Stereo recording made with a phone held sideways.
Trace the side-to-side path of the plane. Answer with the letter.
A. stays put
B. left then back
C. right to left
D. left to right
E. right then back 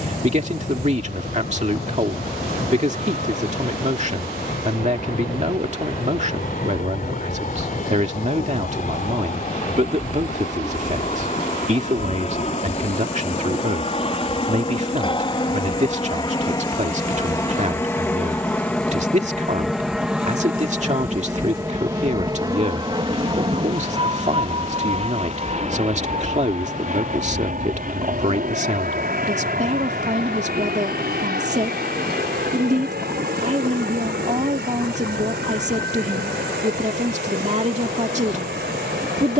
D.